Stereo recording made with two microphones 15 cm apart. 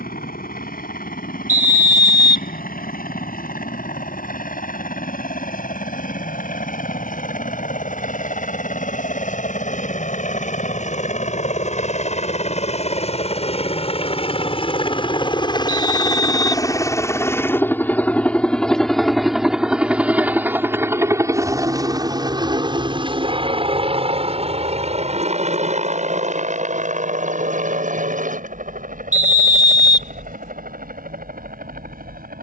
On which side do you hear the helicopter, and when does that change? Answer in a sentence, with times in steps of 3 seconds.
You can hear the helicopter on the left from 0 s, in the centre from 18 s and on the right from 21 s.